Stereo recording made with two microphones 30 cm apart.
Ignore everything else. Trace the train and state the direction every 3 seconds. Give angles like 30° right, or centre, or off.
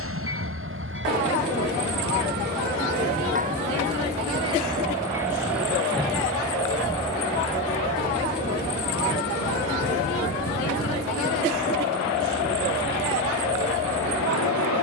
40° right, 20° right, 20° left, 50° left, 60° left.